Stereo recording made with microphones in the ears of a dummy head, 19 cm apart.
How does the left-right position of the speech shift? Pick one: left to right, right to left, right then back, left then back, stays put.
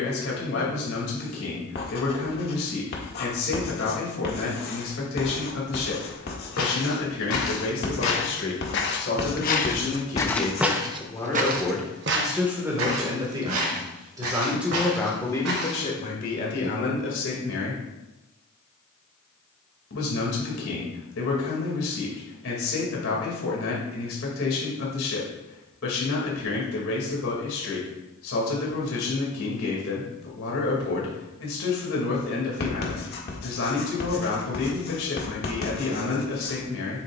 right then back.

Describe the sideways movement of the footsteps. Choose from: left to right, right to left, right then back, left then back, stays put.
left to right.